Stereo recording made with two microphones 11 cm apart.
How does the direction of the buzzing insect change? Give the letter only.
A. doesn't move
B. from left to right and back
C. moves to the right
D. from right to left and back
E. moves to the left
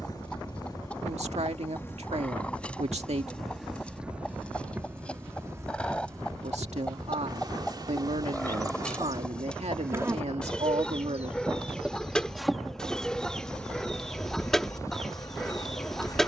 B.